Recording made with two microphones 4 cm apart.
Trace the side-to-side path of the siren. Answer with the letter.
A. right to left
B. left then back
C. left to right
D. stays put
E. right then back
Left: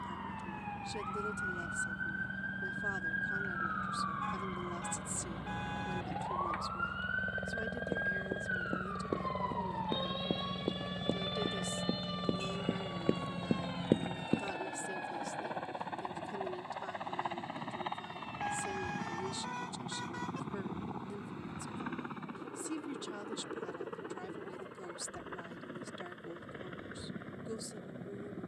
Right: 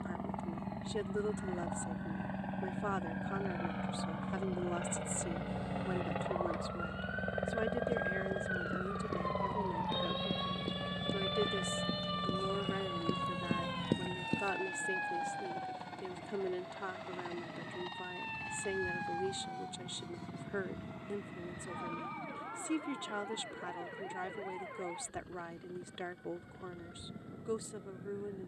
C.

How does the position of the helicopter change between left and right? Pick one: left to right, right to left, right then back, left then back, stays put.
right to left.